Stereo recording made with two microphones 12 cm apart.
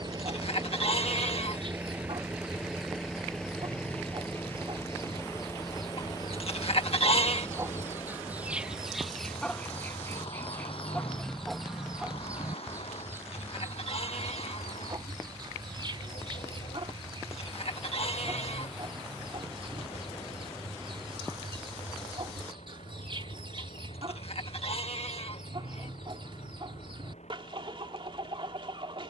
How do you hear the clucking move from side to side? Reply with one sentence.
You can hear the clucking move from right to left and back again.